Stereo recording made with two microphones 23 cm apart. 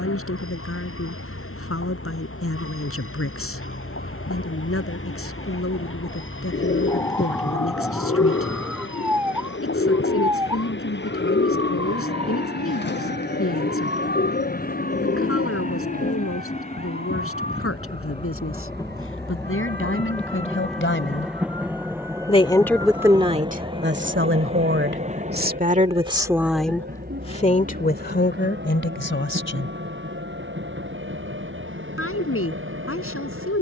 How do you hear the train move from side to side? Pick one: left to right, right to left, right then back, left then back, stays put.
left to right.